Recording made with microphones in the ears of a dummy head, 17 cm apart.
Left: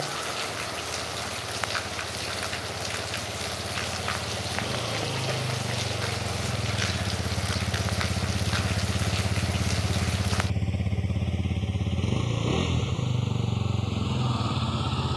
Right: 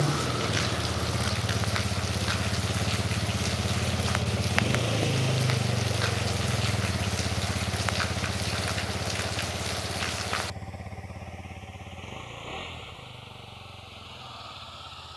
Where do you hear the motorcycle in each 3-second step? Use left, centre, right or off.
right, right, centre, left, left.